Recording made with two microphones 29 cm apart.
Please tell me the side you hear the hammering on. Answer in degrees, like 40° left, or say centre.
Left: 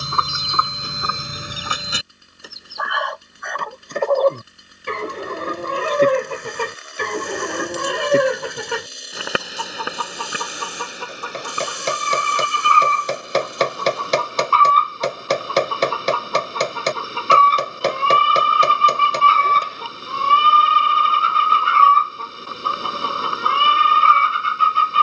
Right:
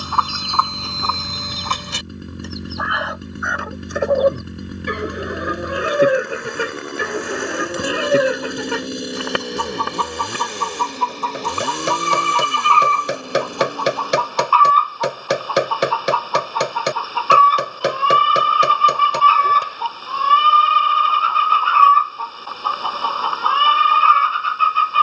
10° right.